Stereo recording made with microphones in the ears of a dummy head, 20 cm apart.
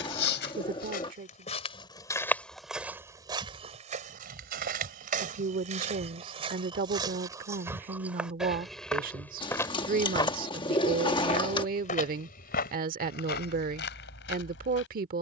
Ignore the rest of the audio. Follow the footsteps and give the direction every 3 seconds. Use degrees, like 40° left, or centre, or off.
20° left, 30° right, 10° right, 20° left, 40° left.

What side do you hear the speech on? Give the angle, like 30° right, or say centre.
40° right.